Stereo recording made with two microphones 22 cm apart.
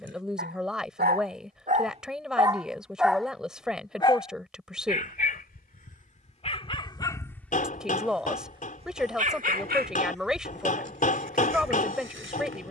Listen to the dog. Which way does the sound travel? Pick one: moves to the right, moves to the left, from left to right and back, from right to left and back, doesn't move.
from right to left and back.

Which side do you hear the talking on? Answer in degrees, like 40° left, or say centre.
centre.